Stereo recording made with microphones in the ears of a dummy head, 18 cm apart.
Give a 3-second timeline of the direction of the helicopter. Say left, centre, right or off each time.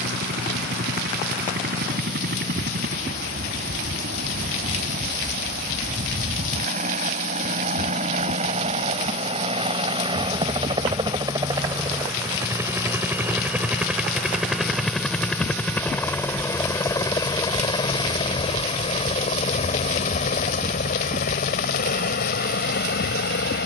right, right, right, right, centre, centre, left, left.